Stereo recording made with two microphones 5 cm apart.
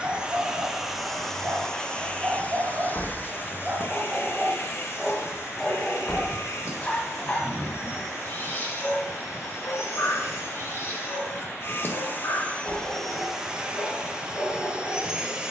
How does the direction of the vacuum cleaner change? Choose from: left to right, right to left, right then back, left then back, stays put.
left then back.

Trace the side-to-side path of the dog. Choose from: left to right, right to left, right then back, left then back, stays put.
right to left.